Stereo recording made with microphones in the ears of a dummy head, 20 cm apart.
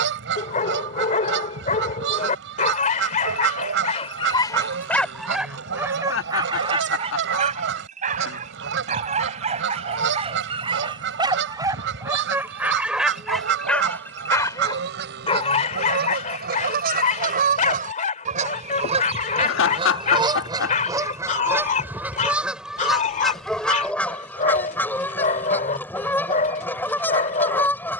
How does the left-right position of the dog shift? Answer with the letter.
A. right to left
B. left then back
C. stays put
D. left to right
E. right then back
E.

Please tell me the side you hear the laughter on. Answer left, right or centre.
left.